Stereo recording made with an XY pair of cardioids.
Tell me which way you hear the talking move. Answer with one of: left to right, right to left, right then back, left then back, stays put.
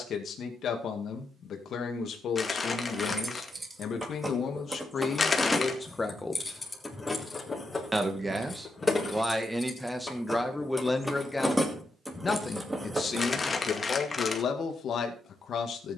right then back.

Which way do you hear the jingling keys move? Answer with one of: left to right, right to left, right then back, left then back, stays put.
left then back.